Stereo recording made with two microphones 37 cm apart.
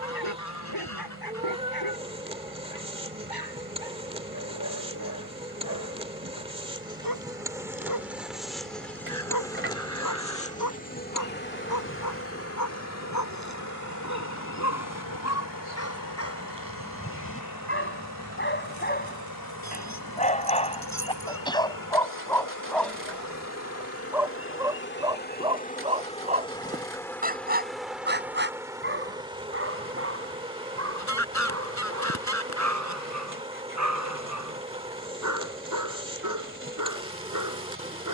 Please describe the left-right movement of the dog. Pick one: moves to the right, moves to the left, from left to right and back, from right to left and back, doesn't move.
moves to the right.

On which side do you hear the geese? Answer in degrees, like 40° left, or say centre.
50° left.